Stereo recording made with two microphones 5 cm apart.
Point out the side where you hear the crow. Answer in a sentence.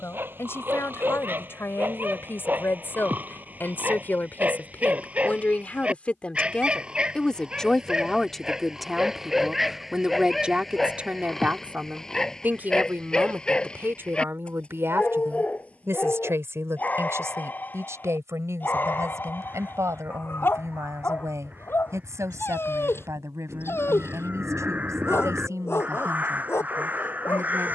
In this clip you hear the crow on the right.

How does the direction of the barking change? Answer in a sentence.
You can hear the barking move from right to left.